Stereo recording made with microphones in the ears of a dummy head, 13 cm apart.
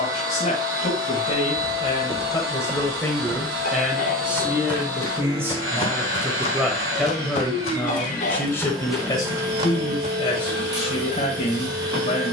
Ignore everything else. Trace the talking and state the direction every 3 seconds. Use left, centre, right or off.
left, centre, centre, left.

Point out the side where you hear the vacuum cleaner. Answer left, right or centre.
right.